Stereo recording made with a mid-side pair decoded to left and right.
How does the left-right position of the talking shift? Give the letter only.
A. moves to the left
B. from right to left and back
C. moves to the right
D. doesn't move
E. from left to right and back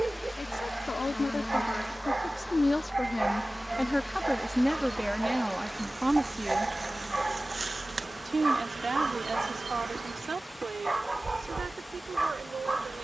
C.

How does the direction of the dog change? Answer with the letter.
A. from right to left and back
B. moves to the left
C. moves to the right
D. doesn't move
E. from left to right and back
D.